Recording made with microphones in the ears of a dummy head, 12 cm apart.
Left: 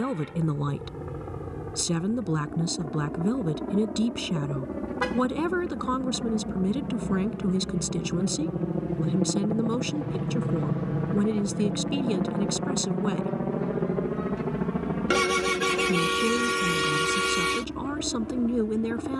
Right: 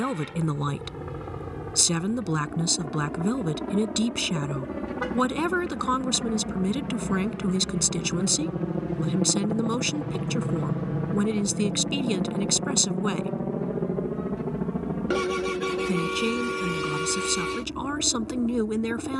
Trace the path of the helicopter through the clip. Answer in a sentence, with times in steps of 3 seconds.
You can hear the helicopter on the right from 0 s, in the centre from 9 s and on the left from 12 s.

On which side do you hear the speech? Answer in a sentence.
You can hear the speech on the right.